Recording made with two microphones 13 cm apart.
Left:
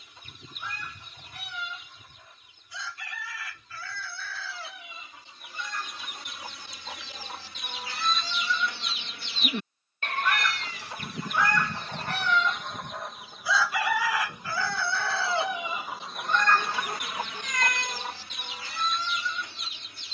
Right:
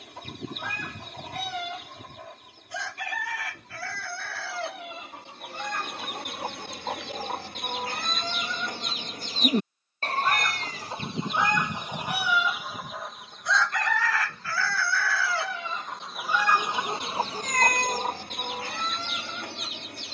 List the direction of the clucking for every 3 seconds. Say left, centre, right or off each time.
right, right, right, right, centre, centre, right.